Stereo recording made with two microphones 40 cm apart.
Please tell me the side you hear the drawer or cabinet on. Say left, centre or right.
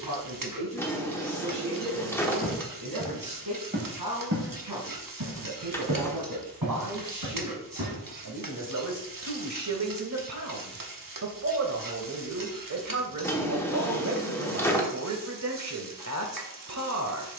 centre.